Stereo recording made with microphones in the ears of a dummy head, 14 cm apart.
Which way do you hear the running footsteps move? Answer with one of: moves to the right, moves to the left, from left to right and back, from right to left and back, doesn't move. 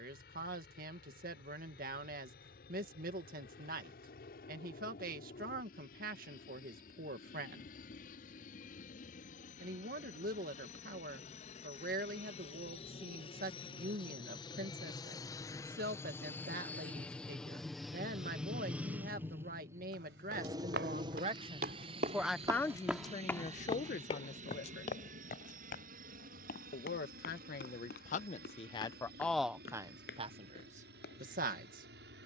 moves to the left.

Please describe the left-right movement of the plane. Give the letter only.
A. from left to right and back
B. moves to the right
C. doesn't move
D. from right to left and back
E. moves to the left
B.